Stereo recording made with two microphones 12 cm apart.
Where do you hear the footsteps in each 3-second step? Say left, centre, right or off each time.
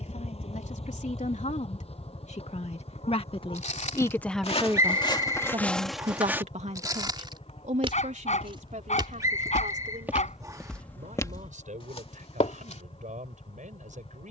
off, left, right, centre, left.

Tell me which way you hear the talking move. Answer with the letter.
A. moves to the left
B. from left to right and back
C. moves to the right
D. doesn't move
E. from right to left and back
C.